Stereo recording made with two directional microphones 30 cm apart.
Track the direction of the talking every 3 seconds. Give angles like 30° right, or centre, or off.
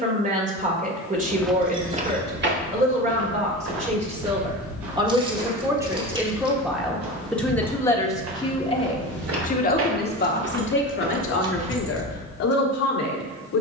30° right, 20° right, 10° left, 40° left, 60° left.